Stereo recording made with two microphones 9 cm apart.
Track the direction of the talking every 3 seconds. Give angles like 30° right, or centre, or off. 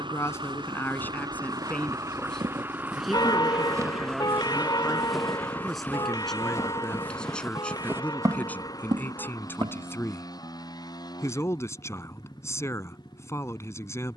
20° left, centre, 10° left, 30° left, 30° left.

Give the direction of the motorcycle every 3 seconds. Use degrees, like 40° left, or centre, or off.
40° right, centre, 30° left, 40° left, 50° left.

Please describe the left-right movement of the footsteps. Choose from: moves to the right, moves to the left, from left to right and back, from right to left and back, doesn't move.
from right to left and back.